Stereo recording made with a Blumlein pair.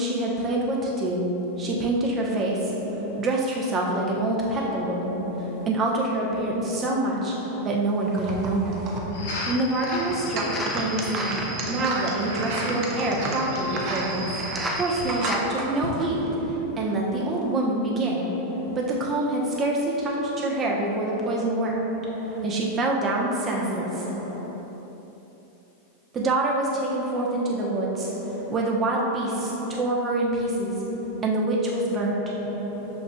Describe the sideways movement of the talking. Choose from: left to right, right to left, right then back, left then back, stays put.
stays put.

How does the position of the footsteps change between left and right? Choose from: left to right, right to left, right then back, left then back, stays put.
right then back.